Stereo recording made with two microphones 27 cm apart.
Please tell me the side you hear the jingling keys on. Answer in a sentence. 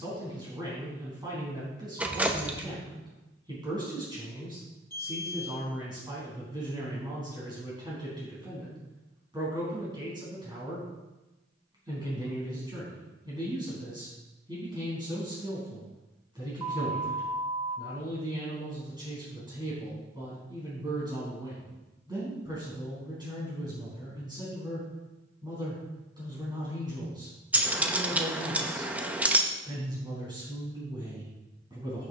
You can hear the jingling keys in the centre.